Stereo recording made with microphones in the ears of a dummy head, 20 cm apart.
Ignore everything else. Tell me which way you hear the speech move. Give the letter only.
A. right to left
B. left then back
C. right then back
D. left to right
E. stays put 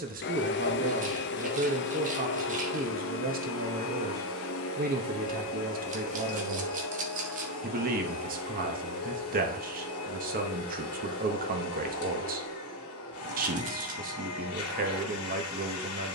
E.